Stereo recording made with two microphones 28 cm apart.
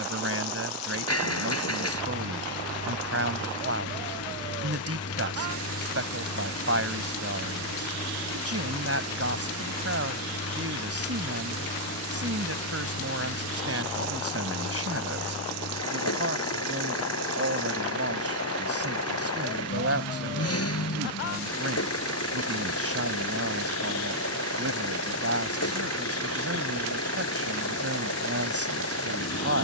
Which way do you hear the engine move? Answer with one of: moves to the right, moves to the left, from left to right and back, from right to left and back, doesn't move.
doesn't move.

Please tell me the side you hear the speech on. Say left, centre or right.
right.